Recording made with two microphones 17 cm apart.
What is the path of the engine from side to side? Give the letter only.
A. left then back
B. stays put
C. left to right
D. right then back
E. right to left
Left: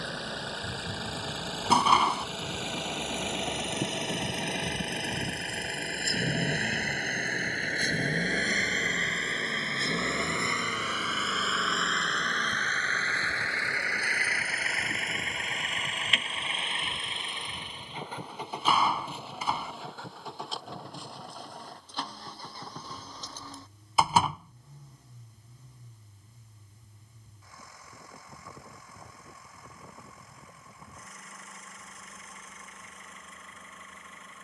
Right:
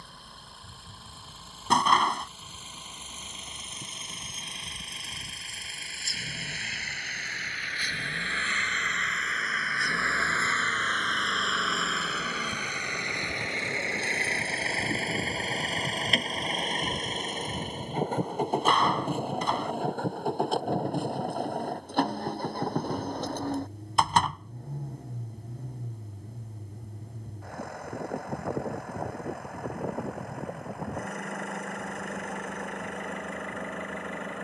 C.